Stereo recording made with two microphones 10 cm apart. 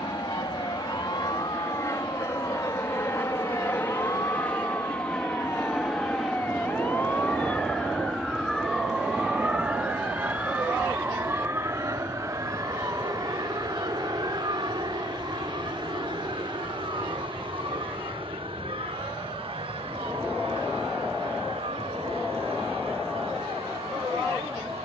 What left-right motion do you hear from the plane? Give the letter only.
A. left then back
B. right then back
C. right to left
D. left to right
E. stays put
D.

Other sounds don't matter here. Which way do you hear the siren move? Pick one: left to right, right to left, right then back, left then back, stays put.
left to right.